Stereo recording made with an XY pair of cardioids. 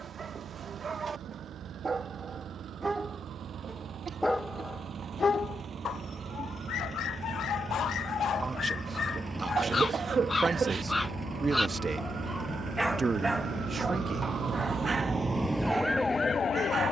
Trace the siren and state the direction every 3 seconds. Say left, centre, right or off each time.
right, right, right, right, right, centre.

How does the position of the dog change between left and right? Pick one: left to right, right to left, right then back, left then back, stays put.
left then back.